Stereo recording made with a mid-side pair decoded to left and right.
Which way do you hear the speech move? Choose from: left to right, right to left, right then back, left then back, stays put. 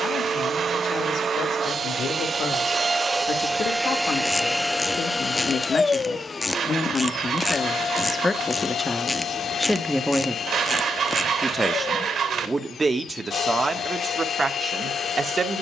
left to right.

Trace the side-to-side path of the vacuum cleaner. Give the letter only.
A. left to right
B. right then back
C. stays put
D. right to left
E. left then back
D.